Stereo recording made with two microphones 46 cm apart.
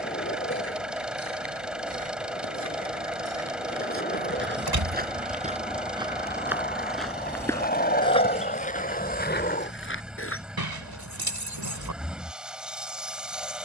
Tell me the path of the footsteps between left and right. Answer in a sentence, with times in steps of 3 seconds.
In this clip you hear the footsteps on the right from 0 s, in the centre from 6 s, on the left from 9 s and not at all from 12 s.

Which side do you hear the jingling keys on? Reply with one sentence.
In this clip you hear the jingling keys on the right.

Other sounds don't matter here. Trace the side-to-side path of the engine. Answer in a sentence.
In this clip you hear the engine stay put.